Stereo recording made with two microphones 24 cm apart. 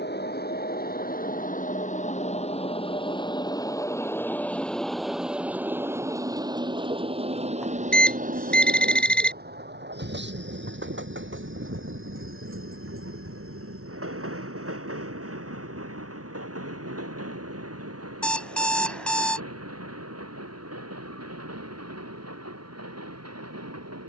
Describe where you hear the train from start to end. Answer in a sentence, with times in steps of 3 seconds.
In this clip you hear the train on the left from 0 s, in the centre from 3 s and on the right from 6 s.